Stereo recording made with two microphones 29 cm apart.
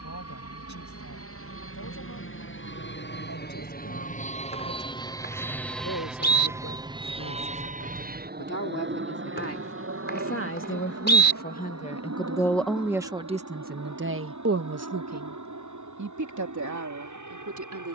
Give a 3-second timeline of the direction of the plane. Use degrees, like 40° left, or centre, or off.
50° left, 20° left, 20° right, 50° right, 60° right, 70° right.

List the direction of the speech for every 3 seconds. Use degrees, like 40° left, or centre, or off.
70° left, 70° left, 60° left, 40° left, 20° right, 70° right.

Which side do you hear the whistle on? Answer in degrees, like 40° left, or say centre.
40° left.